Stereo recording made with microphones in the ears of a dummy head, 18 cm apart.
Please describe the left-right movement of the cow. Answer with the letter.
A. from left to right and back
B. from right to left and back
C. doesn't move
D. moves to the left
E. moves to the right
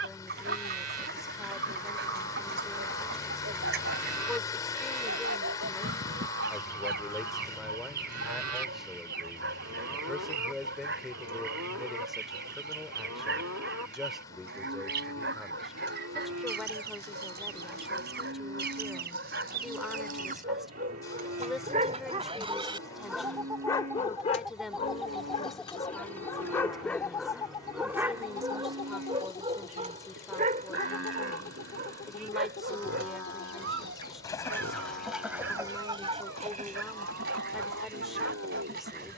C.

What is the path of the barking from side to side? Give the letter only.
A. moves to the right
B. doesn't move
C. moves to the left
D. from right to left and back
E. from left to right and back
D.